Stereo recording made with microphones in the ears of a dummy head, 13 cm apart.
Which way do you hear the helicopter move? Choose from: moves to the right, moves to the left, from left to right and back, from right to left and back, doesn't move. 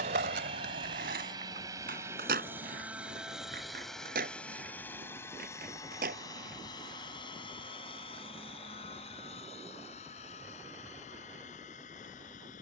moves to the left.